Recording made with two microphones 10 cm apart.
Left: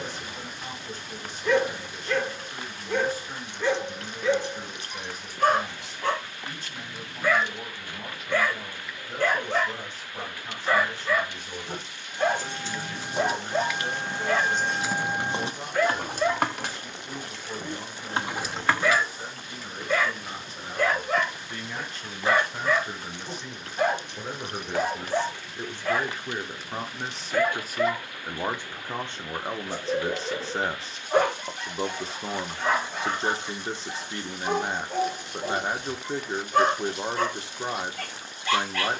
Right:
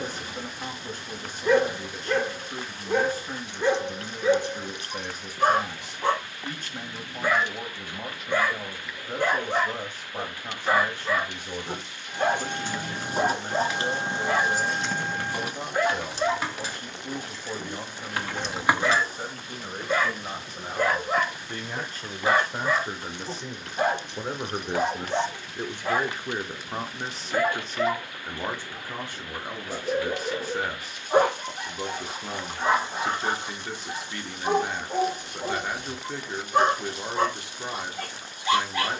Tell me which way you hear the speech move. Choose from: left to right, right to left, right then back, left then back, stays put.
right to left.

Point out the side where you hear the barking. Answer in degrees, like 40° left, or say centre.
20° right.